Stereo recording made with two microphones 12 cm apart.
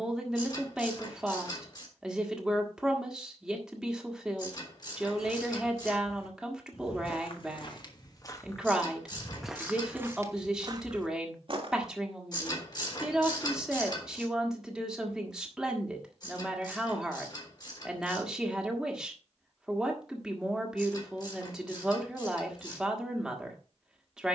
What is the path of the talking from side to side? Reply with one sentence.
You can hear the talking stay put.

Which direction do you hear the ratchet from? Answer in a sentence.
You can hear the ratchet on the left.